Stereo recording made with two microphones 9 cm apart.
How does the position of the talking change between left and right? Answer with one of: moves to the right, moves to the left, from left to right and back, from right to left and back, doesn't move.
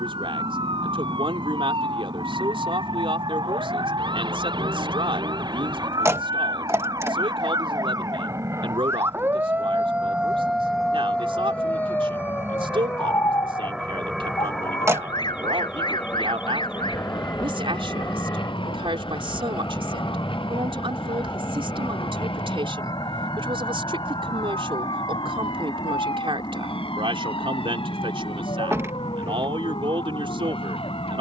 doesn't move.